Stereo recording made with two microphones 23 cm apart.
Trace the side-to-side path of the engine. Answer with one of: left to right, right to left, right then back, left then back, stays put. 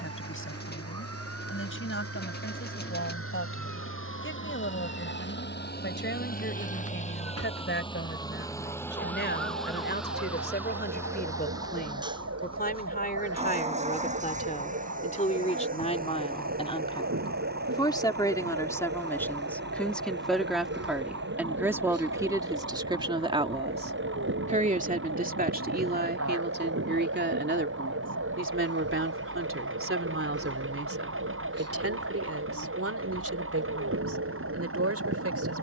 left to right.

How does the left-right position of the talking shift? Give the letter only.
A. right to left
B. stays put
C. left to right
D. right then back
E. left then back
C.